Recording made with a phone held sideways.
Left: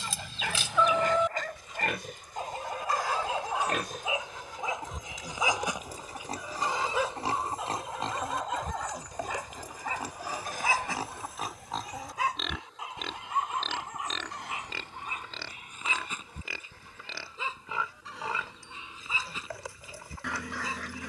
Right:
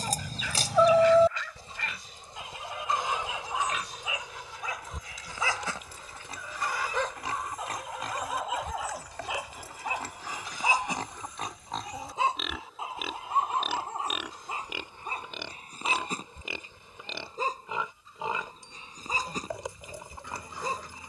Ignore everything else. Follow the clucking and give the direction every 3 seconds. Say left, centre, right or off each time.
right, centre, left, left, left, left, left.